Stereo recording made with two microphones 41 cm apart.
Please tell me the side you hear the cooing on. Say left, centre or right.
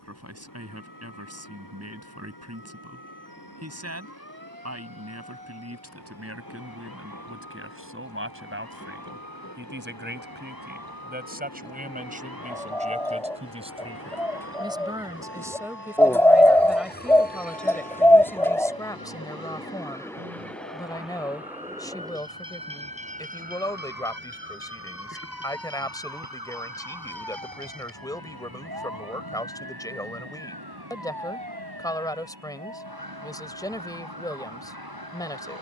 centre.